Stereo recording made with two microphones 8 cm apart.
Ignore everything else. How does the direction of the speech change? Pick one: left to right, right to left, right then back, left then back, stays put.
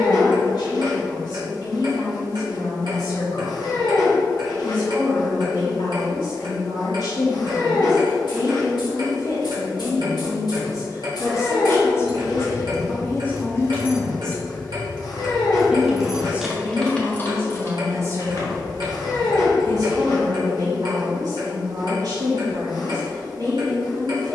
left to right.